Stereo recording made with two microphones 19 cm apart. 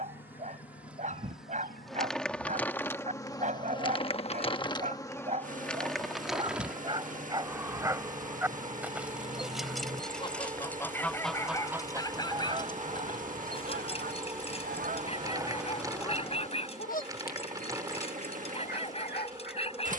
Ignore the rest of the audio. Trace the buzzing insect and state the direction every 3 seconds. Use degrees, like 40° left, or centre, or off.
centre, 20° left, 10° right, 20° right, 20° right, 20° right, 20° right.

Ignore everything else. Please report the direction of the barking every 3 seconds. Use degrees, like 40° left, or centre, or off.
40° right, 40° right, 20° right, 10° left, 30° left, 30° left, 30° left.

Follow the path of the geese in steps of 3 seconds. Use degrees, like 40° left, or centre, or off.
60° left, 60° left, 50° left, 20° left, 40° right, 10° left, 60° left.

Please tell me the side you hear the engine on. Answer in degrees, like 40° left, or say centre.
40° right.